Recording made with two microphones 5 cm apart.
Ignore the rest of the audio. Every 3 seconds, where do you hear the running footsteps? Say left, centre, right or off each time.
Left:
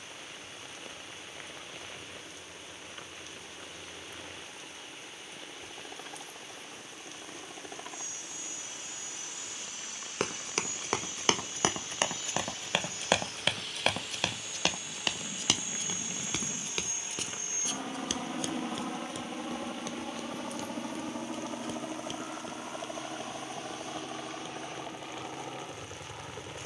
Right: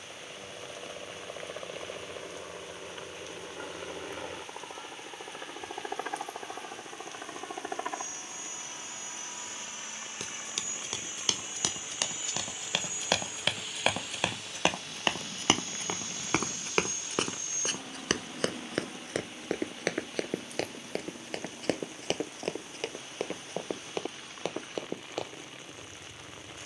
off, off, off, left, centre, right, right, right, right.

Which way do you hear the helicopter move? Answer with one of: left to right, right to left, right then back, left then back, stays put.
right to left.